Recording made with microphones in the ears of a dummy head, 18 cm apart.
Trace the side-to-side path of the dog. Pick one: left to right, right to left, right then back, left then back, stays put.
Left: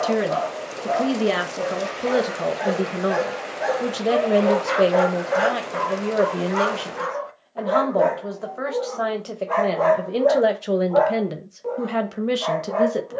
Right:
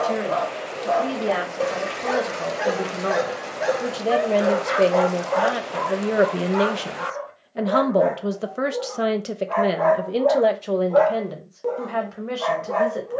left then back.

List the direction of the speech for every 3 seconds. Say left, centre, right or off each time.
left, centre, right, centre, left.